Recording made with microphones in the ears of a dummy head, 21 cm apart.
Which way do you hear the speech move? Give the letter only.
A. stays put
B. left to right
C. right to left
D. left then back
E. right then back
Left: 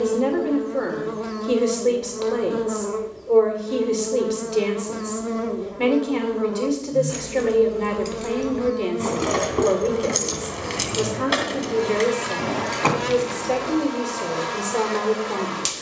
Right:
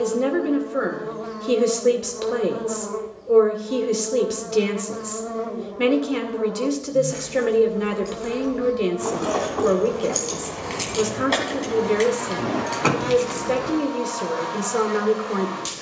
A.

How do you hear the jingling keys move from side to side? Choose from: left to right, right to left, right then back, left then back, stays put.
left to right.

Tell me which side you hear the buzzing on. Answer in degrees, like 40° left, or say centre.
40° left.